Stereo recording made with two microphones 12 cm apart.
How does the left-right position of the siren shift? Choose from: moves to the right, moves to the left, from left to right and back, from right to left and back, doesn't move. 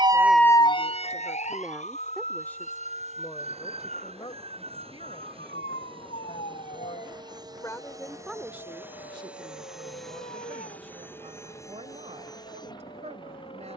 moves to the left.